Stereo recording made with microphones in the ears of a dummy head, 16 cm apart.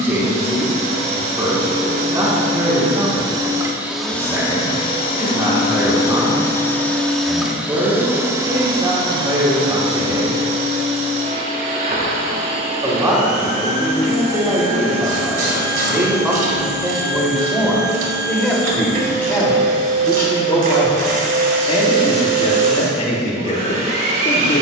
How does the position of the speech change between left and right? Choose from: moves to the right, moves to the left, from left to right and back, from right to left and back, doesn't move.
moves to the left.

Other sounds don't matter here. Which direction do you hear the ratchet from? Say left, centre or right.
right.